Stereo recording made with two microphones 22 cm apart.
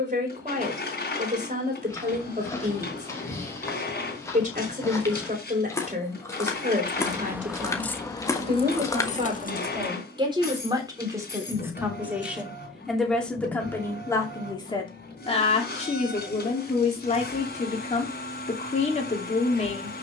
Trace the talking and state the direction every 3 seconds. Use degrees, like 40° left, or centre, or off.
40° right, 40° right, 30° right, 20° right, 10° left, 30° left, 30° left.